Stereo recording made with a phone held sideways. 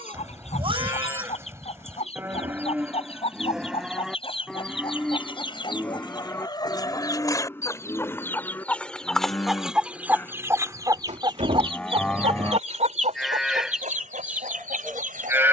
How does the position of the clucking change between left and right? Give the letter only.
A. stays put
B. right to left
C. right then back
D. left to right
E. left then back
D.